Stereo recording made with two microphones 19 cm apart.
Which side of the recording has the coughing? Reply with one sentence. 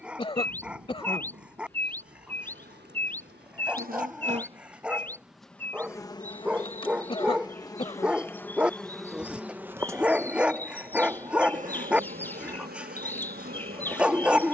In this clip you hear the coughing on the left.